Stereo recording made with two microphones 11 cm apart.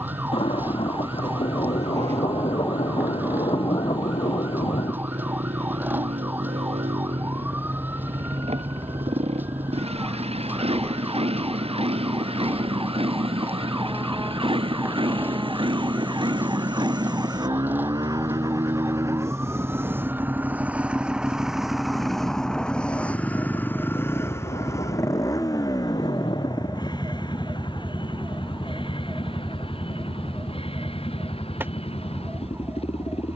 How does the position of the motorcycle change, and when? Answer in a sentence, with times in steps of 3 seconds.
In this clip you hear the motorcycle on the right from 0 s, in the centre from 21 s and on the left from 24 s.